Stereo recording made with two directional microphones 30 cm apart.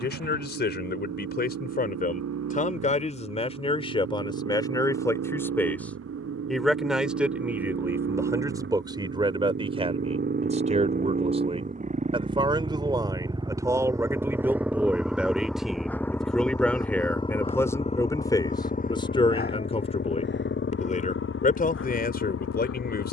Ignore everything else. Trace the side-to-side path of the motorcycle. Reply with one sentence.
You can hear the motorcycle move from right to left.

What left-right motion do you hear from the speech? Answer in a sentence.
You can hear the speech go right and come back.